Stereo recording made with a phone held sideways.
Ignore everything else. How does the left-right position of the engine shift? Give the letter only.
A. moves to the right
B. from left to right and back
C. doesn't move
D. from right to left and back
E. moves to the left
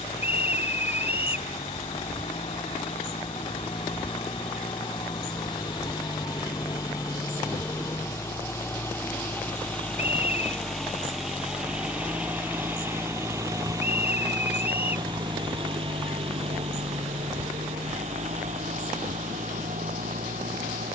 A.